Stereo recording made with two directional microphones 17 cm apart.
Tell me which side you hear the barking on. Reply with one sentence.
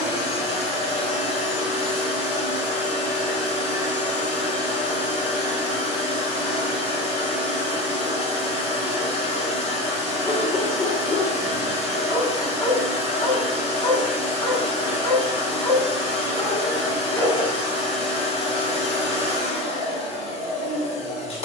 In this clip you hear the barking on the left.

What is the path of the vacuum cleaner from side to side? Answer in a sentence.
You can hear the vacuum cleaner stay put.